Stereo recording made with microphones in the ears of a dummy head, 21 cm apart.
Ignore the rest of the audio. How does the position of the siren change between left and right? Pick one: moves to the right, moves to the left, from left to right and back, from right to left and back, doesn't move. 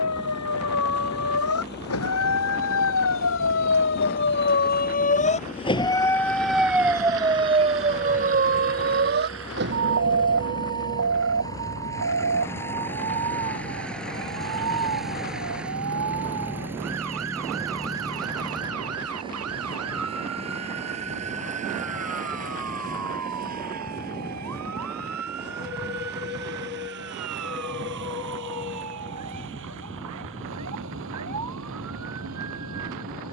moves to the right.